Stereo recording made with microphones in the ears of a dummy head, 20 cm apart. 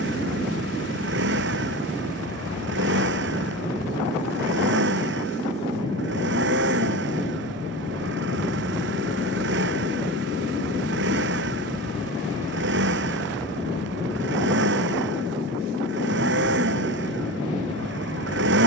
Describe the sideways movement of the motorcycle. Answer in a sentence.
In this clip you hear the motorcycle stay in one place.